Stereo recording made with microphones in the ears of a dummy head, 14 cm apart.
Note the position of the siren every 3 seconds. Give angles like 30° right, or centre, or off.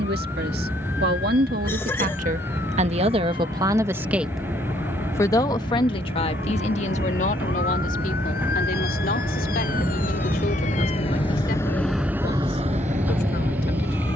80° left, 80° left, 70° left, 50° left, 50° right.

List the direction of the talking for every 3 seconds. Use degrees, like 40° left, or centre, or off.
60° right, centre, 50° left, 60° left, 60° left.